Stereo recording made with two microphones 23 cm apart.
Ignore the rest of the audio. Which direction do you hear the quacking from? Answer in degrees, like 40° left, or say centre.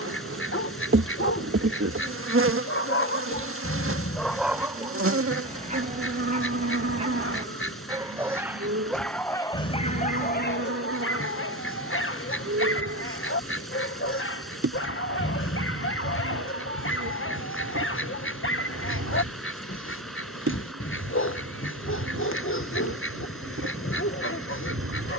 60° left.